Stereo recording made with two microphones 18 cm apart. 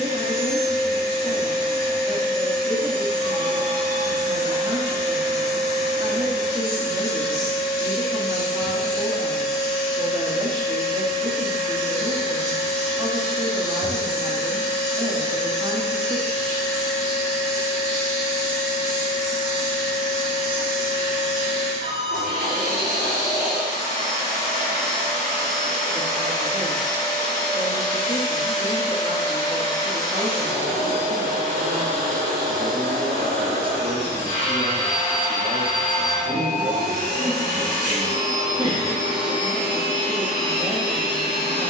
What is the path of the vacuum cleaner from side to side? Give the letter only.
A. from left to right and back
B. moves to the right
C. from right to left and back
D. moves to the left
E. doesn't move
E.